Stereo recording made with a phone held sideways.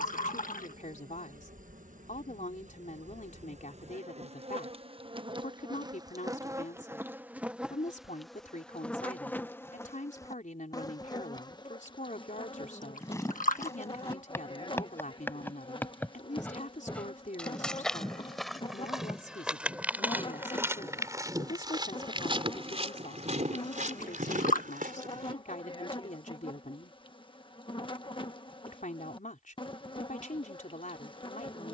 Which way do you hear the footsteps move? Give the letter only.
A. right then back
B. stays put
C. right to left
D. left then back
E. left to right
E.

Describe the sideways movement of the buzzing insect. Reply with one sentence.
You can hear the buzzing insect move from right to left.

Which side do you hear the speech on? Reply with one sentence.
In this clip you hear the speech on the left.